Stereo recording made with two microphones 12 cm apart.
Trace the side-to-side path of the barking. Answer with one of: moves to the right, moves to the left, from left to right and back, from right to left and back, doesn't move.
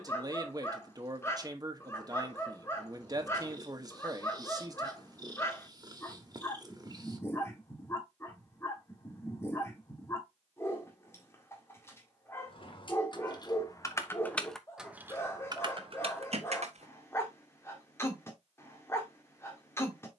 doesn't move.